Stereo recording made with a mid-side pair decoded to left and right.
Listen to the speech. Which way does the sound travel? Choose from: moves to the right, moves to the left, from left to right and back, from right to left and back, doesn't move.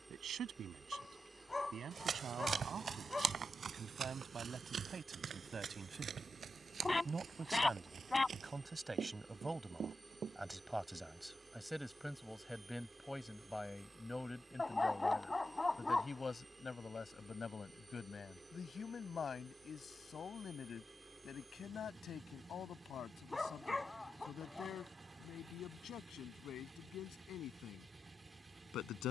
moves to the left.